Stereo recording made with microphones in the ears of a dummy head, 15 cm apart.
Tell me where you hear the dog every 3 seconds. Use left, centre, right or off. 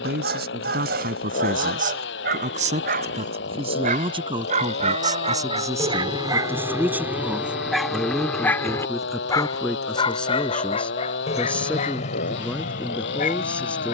right, right, centre, left, left.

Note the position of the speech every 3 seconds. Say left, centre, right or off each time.
right, right, centre, centre, centre.